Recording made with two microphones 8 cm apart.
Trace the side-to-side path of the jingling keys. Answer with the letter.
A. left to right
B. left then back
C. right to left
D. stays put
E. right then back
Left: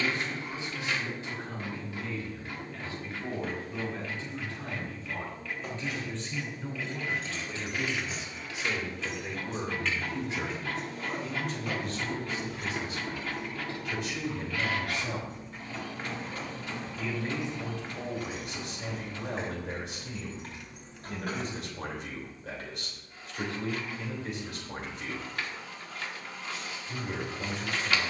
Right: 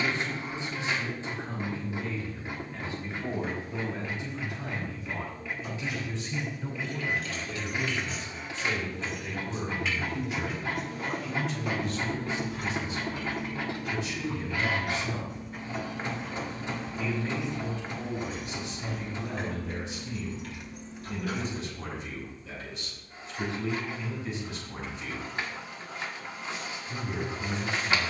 E.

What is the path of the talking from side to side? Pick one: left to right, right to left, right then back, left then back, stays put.
right to left.